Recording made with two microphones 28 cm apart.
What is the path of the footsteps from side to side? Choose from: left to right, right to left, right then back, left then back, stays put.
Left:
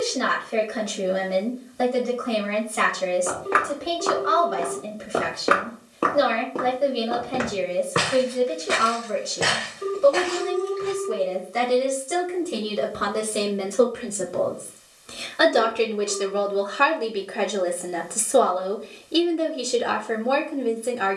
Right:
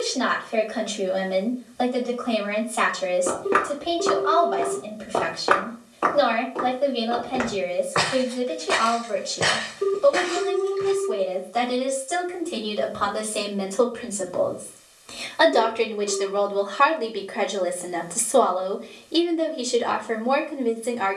left then back.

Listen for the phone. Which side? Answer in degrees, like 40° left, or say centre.
50° right.